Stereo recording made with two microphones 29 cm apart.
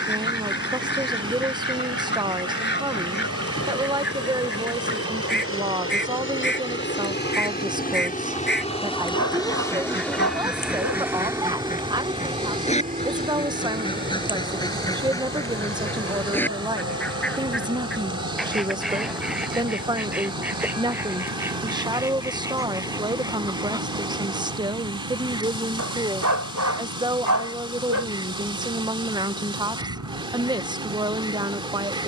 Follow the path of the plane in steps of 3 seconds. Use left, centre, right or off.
left, left, left, centre, right, right, right, right, right, right, right.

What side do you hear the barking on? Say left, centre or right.
right.